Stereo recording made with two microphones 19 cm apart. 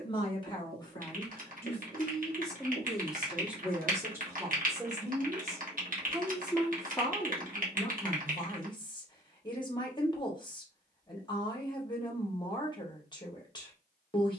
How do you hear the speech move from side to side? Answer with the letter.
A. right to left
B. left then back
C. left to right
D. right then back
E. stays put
D.